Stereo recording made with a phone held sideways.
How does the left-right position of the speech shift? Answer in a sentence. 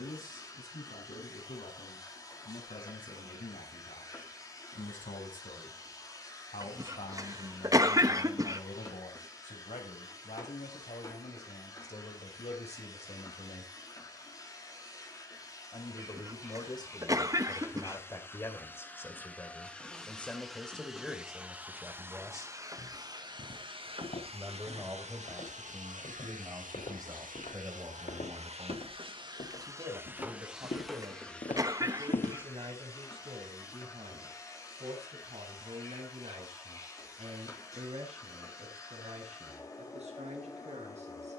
In this clip you hear the speech move to the right.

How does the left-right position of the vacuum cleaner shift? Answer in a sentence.
You can hear the vacuum cleaner move from left to right and back again.